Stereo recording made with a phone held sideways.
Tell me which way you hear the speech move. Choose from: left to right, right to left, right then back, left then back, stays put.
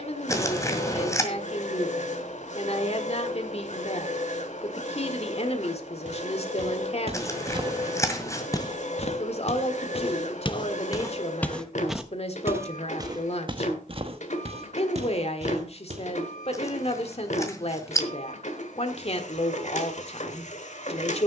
stays put.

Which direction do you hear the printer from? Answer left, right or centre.
left.